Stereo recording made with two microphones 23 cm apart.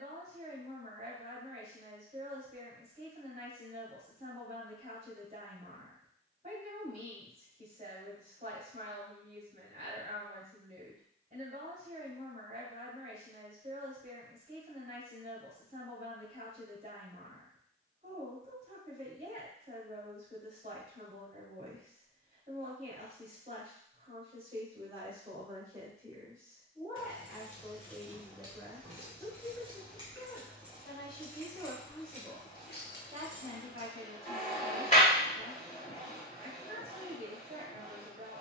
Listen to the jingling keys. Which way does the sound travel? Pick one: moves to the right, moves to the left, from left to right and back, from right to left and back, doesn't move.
from left to right and back.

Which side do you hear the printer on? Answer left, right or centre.
left.